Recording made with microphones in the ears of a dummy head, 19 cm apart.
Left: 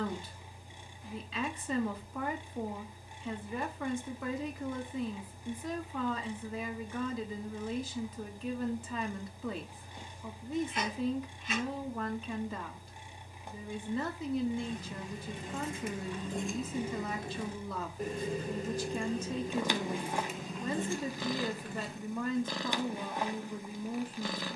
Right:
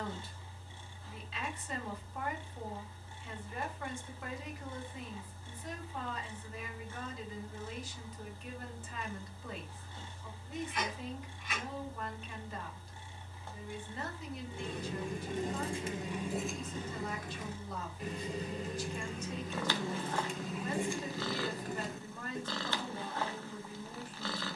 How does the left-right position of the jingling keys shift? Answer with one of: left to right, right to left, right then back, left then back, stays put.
left then back.